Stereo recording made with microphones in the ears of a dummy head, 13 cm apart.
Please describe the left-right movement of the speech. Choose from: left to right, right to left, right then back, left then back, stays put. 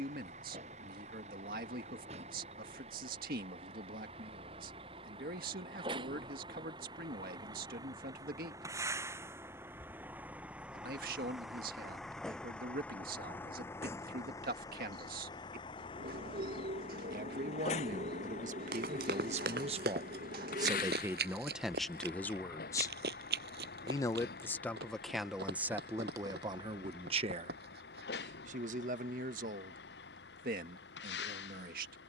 left then back.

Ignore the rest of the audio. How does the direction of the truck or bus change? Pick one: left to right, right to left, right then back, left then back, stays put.
right to left.